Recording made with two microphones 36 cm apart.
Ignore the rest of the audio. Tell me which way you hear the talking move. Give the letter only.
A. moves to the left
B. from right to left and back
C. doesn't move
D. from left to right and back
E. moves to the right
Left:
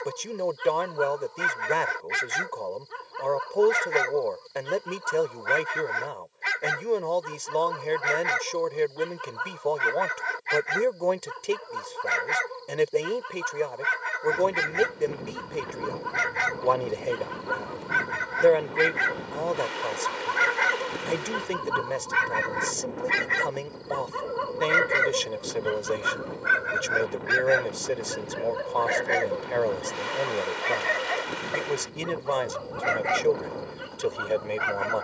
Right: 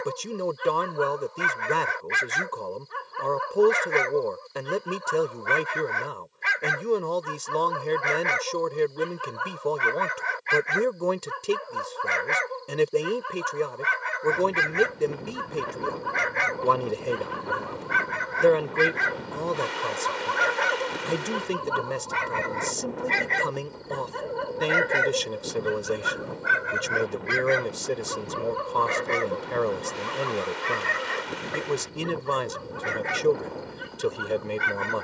C.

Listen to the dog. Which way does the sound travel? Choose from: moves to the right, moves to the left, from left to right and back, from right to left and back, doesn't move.
moves to the right.